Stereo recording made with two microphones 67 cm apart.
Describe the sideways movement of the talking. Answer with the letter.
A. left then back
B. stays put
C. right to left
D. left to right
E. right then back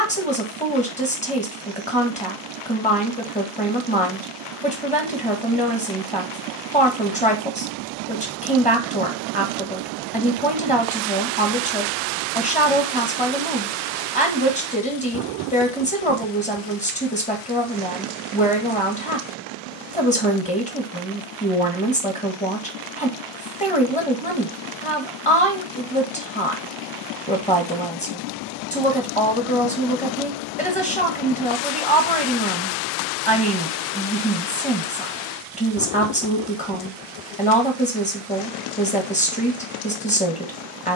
B.